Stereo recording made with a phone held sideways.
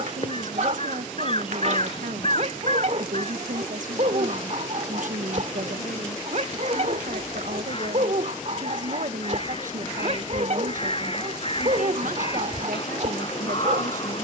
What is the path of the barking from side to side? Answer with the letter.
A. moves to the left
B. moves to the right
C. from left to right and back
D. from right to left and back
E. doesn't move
E.